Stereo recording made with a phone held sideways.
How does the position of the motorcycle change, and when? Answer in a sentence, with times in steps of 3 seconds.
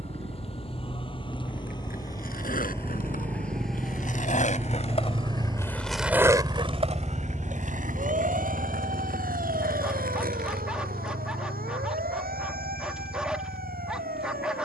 In this clip you hear the motorcycle on the right from 0 s, in the centre from 6 s and on the left from 9 s.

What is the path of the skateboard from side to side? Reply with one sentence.
In this clip you hear the skateboard move to the right.